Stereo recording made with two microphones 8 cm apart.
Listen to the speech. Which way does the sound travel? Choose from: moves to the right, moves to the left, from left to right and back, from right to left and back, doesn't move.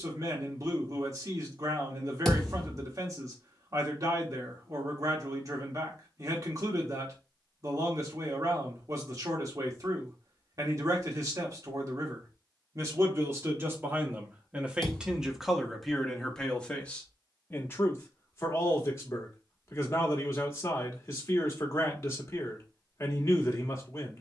moves to the left.